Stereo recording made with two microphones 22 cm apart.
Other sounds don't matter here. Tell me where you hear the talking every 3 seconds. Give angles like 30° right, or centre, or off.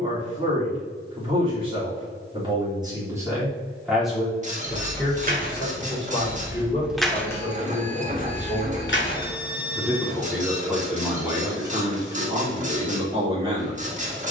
20° right, centre, 20° left, 10° right, 20° right.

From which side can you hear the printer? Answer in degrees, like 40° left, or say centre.
30° right.